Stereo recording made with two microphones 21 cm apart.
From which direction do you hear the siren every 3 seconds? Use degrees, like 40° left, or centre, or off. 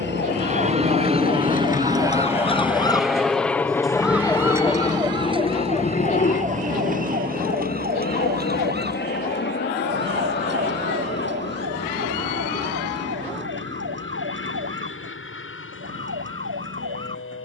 40° left, 10° right, 40° right, 60° right, 60° right, 70° right.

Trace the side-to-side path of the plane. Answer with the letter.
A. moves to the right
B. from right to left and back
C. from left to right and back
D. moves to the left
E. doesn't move
D.